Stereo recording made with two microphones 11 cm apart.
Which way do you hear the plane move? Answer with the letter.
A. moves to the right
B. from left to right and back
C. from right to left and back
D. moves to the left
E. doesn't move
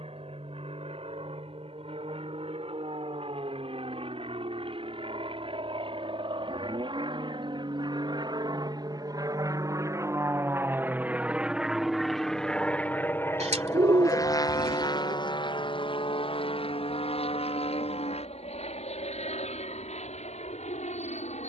D.